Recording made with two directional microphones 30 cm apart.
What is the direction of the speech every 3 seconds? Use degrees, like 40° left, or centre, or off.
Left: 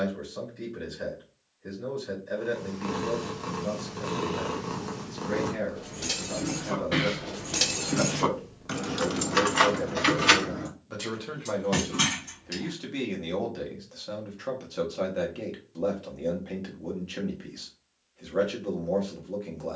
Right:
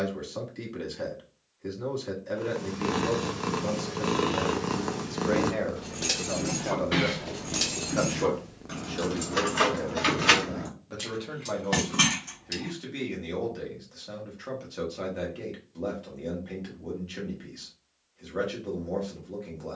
70° right, 60° right, 40° right, centre, 20° left, 20° left, 20° left.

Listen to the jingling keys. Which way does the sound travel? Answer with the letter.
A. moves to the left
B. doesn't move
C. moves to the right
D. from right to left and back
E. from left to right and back
D.